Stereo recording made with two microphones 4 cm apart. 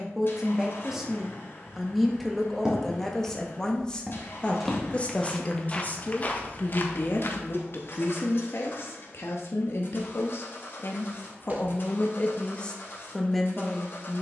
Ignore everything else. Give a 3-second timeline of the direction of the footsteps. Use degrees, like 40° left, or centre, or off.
20° right, centre, 50° left, off, off.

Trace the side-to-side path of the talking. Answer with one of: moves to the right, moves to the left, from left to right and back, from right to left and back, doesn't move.
from right to left and back.